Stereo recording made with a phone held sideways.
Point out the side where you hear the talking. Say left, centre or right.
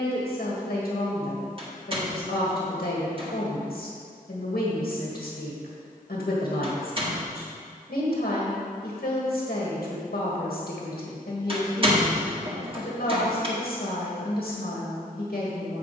left.